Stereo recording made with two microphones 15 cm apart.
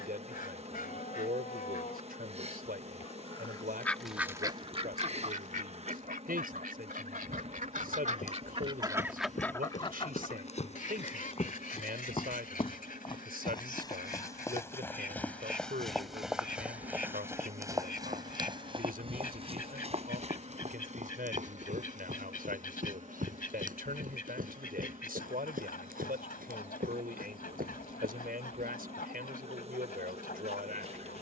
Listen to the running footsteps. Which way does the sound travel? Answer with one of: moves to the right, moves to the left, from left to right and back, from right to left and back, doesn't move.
moves to the right.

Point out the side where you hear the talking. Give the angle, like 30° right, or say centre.
80° right.